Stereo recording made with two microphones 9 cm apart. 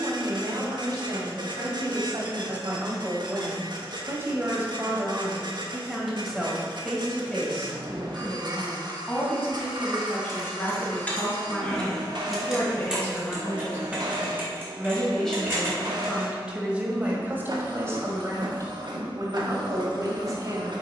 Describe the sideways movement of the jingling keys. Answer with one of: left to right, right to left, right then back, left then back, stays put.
left to right.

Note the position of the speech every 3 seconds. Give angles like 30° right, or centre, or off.
50° right, 20° right, 10° left, 30° left, 20° left, 10° right, 40° right.